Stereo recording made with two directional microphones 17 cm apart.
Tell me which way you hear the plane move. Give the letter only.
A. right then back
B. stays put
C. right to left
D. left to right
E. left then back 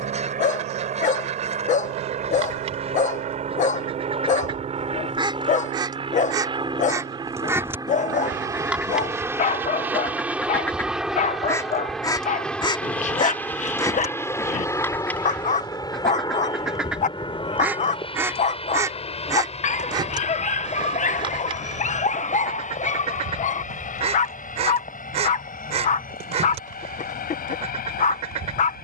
C.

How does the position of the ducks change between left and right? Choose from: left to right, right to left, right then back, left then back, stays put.
left then back.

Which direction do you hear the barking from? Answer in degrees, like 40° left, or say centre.
50° left.